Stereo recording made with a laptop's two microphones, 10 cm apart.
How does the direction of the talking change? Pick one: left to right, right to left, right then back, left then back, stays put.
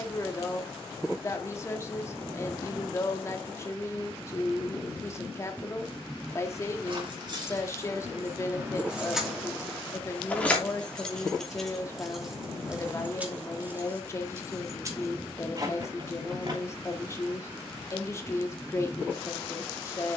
stays put.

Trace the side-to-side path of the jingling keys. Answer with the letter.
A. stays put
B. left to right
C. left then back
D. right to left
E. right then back
C.